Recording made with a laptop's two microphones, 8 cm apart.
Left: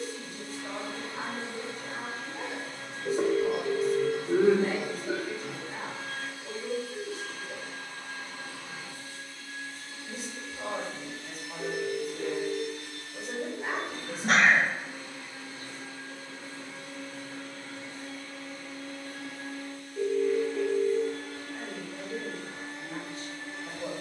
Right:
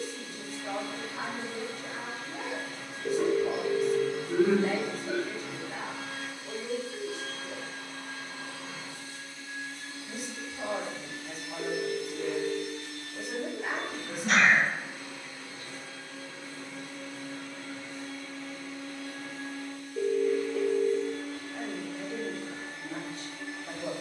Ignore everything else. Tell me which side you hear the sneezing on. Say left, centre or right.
left.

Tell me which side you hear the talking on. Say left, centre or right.
left.